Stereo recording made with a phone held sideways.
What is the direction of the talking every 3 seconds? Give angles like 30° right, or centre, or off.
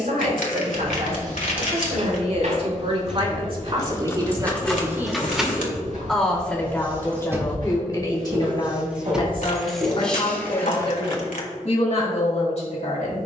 60° right, 30° right, 20° left, 50° left, 50° left.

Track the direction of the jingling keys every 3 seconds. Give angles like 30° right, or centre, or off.
off, 10° left, 10° right, 10° left, off.